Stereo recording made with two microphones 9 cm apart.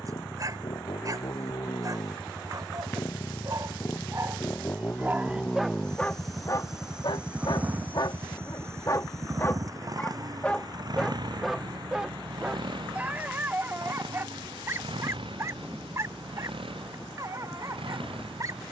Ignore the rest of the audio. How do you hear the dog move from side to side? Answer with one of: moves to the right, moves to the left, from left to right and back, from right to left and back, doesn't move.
from right to left and back.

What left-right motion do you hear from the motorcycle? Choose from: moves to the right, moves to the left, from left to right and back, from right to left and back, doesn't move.
moves to the right.